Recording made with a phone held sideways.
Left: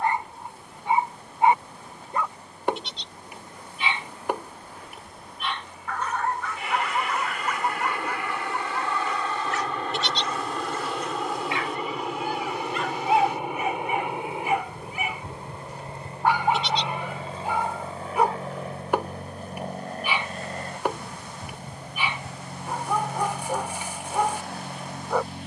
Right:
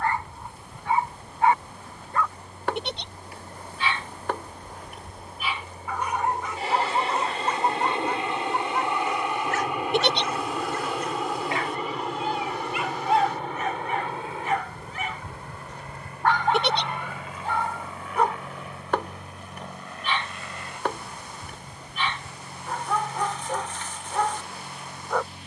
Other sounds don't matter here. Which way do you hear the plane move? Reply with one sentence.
In this clip you hear the plane move from right to left.